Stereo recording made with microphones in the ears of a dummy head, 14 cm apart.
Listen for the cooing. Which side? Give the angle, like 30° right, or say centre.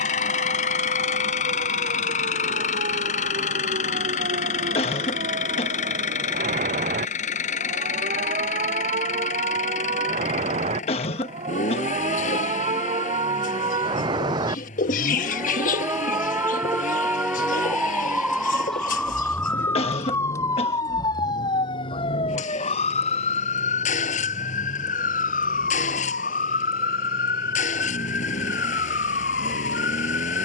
60° left.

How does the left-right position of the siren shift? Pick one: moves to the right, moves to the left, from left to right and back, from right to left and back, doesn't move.
moves to the left.